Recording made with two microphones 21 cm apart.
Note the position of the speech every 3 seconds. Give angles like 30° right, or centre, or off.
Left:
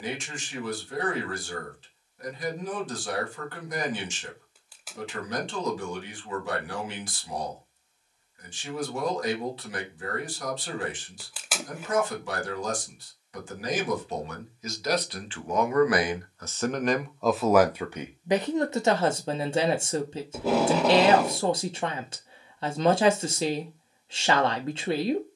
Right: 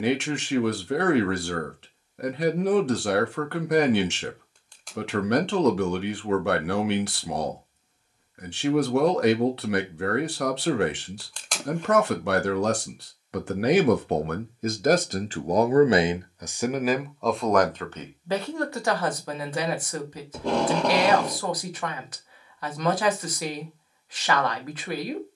70° right, 70° right, 70° right, 70° right, 60° right, 20° right, 20° left, 30° left, 30° left.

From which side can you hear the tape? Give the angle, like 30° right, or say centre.
10° left.